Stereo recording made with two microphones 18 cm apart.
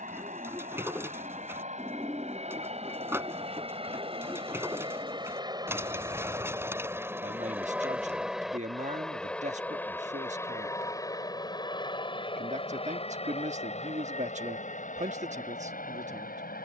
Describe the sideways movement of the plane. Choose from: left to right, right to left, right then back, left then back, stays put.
right to left.